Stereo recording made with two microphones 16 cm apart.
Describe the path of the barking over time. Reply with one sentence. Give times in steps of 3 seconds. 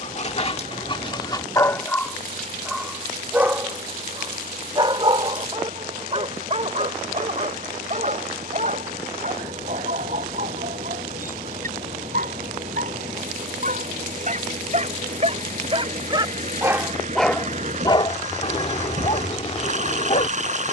You can hear the barking on the left from 0 s, on the right from 3 s, in the centre from 15 s and on the left from 18 s.